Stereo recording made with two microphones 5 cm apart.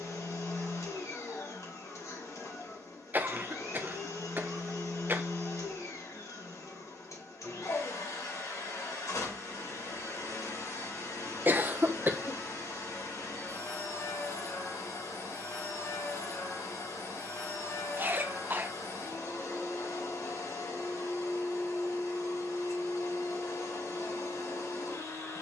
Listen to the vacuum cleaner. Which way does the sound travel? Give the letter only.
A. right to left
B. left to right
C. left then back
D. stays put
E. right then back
D.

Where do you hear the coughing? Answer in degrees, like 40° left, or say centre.
40° right.